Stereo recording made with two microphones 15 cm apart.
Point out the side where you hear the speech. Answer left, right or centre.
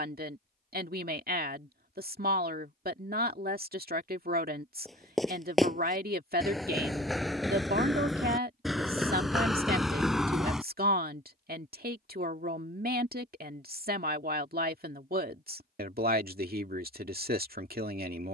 right.